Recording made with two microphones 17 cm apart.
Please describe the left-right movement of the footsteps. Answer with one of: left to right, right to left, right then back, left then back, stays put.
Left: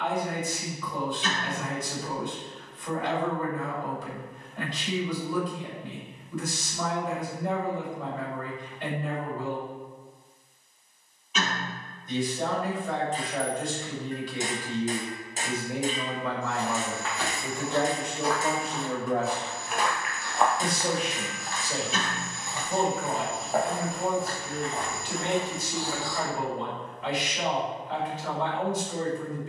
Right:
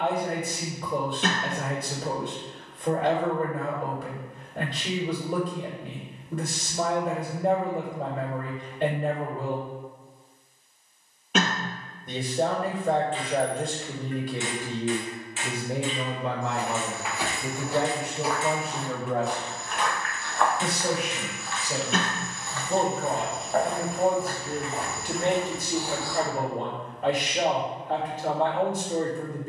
left then back.